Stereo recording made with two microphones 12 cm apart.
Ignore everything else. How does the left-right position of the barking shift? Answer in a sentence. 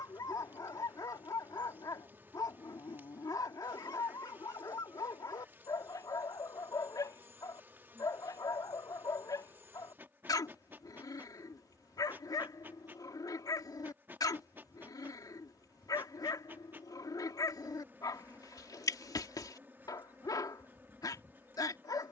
In this clip you hear the barking stay in one place.